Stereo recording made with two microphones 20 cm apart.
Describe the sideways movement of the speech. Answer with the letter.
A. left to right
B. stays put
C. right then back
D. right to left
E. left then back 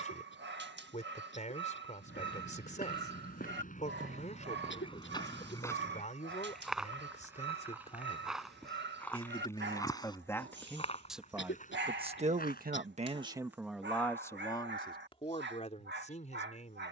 C.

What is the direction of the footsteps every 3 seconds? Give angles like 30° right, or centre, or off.
50° left, 30° left, centre, 30° left, 50° left, off.